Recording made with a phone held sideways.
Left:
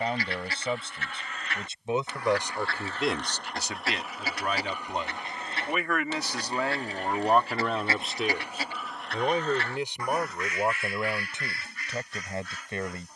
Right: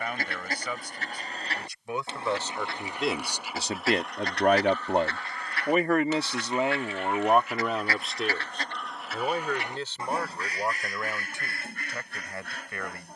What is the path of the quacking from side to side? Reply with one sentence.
You can hear the quacking go left and come back.